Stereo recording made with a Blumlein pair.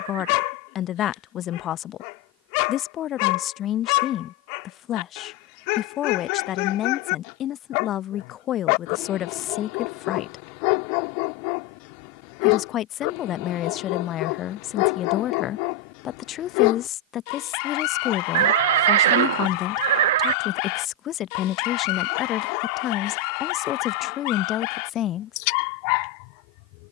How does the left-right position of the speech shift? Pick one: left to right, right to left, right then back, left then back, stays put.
stays put.